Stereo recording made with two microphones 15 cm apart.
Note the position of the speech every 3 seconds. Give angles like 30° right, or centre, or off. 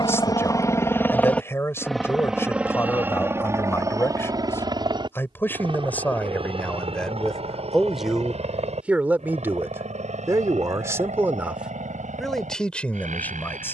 20° left, 10° left, centre, 10° right, 10° left.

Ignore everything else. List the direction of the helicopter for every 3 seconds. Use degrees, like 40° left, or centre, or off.
10° left, 20° right, 40° right, 40° right, 50° right.